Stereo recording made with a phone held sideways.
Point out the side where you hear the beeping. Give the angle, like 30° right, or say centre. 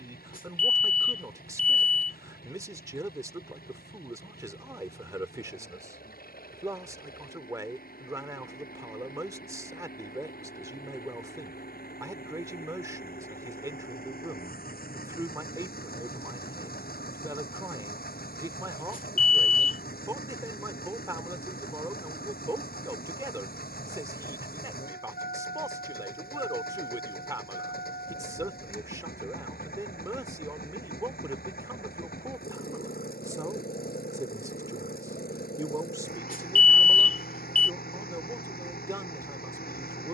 60° left.